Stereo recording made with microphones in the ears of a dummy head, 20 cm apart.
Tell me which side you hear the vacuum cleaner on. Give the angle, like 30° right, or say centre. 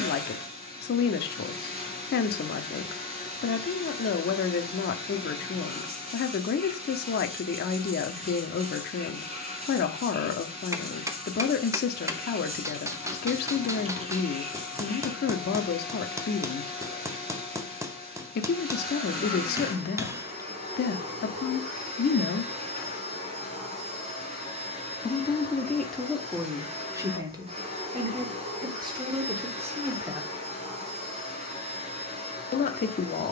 30° right.